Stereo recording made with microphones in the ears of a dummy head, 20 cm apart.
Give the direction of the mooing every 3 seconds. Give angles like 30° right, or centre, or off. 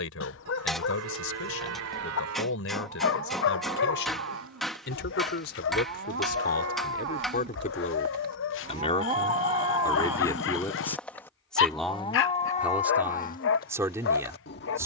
80° right, 70° right, 50° right, 10° right, 40° left.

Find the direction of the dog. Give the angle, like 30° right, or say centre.
60° left.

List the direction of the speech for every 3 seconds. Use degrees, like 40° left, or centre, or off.
60° left, 60° left, 40° left, 10° left, 10° right.